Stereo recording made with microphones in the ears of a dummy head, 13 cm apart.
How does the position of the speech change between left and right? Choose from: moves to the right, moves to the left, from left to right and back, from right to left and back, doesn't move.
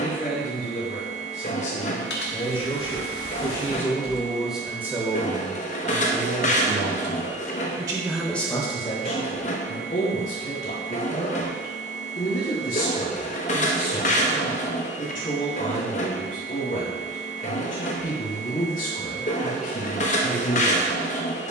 from left to right and back.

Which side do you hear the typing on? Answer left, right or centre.
left.